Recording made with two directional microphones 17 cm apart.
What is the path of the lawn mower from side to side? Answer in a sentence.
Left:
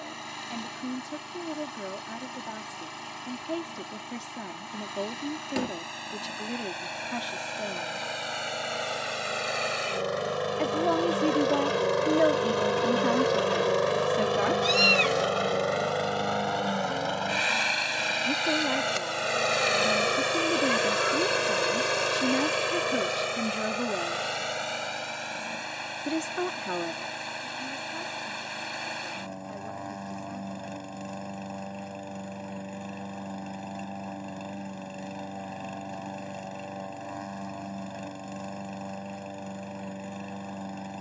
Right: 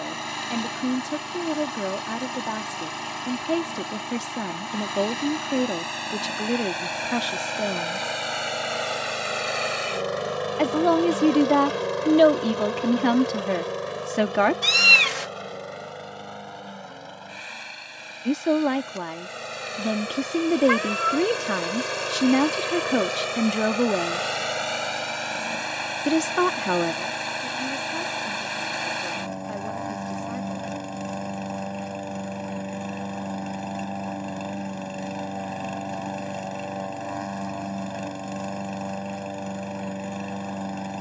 You can hear the lawn mower go left and come back.